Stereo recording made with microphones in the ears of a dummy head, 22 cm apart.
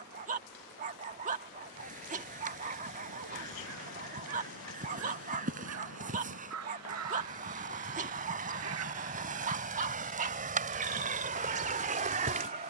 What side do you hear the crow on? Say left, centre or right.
right.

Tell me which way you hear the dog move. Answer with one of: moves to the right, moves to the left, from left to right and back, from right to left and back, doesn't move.
doesn't move.